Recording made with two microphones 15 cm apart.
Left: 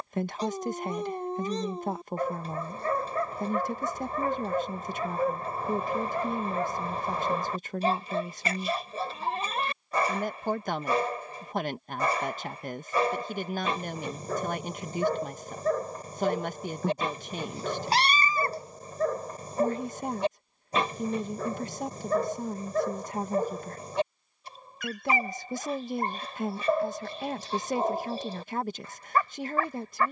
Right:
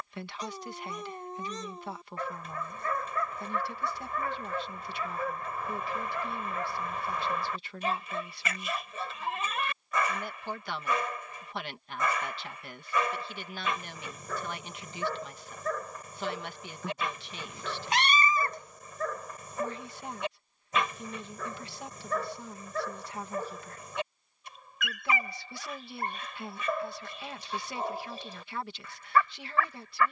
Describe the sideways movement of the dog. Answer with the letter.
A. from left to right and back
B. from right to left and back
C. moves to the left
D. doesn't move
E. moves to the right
D.